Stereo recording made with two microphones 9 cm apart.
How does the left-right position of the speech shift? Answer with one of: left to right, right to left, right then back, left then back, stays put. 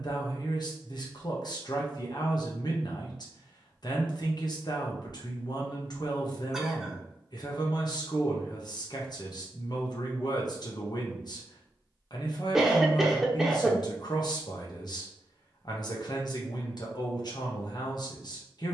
stays put.